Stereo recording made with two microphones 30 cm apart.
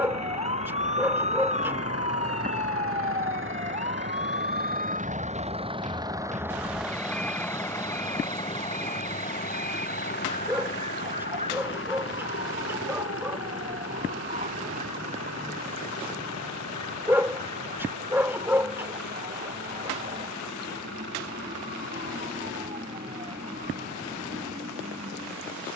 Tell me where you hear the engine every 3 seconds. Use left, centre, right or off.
right, right, centre, left, left, left, left, left, left.